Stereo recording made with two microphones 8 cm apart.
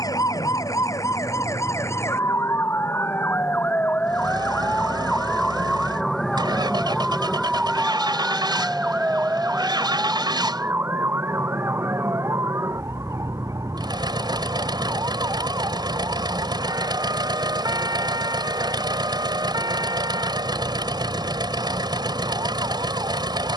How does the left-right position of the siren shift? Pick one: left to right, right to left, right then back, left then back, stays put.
left to right.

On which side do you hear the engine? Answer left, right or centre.
right.